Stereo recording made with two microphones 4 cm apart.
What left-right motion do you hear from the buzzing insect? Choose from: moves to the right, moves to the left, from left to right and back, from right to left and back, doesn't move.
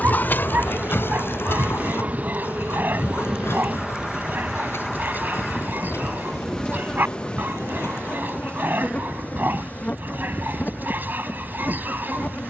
moves to the left.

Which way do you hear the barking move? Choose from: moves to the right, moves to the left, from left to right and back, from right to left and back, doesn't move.
doesn't move.